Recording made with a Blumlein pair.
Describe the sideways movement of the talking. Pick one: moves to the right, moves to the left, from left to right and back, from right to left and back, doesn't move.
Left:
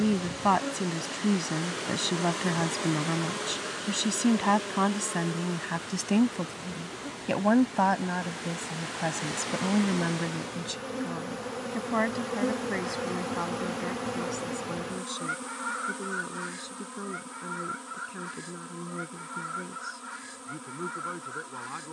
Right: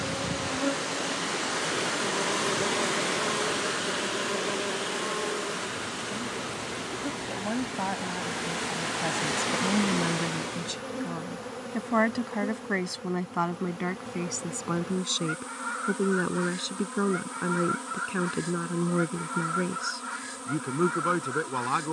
moves to the right.